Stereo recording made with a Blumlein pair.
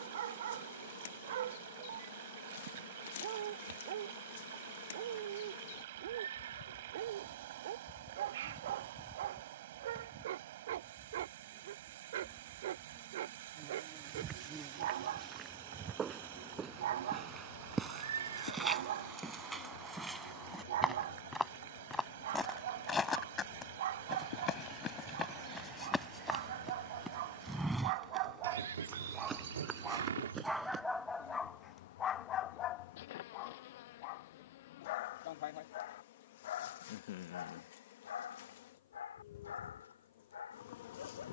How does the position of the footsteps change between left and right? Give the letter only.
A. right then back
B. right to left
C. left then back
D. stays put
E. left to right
C.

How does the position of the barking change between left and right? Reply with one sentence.
In this clip you hear the barking travel towards the left.